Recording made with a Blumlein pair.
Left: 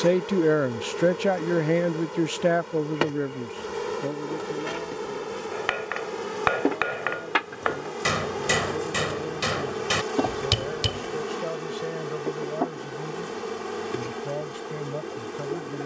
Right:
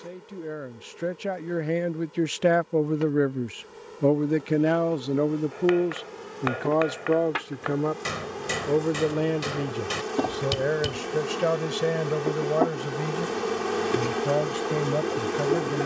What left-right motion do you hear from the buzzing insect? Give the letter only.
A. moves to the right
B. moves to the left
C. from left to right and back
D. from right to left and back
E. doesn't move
A.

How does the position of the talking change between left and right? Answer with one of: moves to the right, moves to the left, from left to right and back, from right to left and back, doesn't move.
moves to the right.